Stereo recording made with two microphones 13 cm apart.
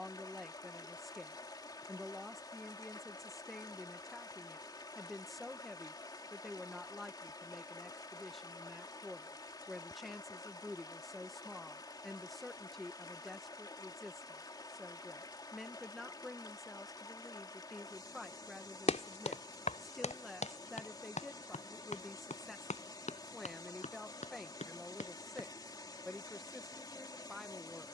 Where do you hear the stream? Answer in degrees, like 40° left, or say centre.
30° left.